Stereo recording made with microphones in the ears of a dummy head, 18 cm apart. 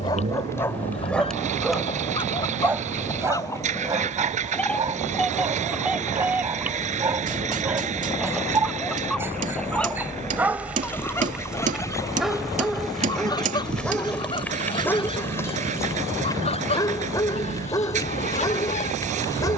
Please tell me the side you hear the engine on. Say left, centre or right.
right.